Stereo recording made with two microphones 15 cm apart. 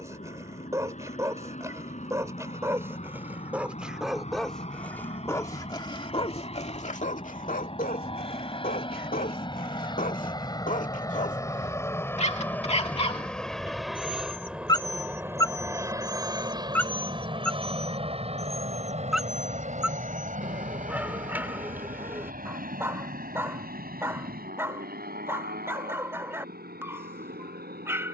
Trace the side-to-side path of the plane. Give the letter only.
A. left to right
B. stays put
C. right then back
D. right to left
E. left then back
A.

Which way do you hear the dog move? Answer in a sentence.
In this clip you hear the dog move from right to left and back again.